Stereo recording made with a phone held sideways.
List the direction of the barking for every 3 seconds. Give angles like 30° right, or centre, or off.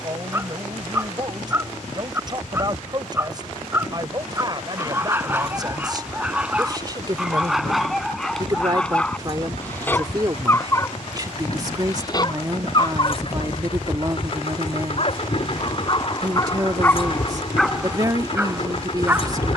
20° right, 20° right, centre, 20° left, 30° left, 20° left, 10° right.